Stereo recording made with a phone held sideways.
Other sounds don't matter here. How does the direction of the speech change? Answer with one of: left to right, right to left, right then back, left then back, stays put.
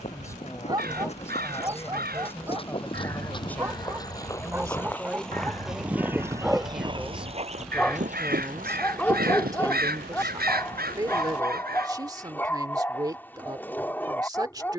left to right.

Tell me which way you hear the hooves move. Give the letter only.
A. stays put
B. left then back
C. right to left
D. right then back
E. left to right
E.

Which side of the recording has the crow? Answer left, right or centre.
right.